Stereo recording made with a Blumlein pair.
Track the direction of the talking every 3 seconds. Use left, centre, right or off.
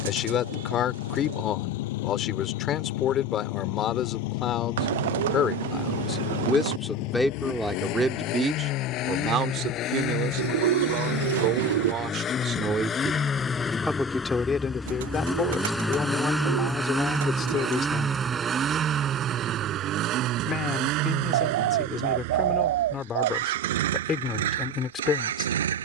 left, left, centre, right, centre, left, left, left, left.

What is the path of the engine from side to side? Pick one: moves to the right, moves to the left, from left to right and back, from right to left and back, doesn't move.
moves to the right.